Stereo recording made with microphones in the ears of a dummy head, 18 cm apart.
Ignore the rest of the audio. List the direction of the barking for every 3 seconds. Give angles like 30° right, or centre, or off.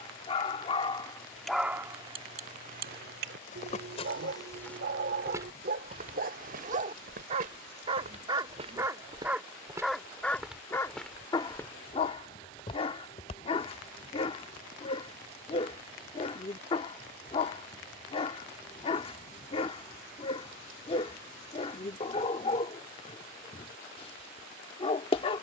centre, 50° right, 30° right, 10° left, 30° left, 30° left, 30° left, 30° left, 30° left.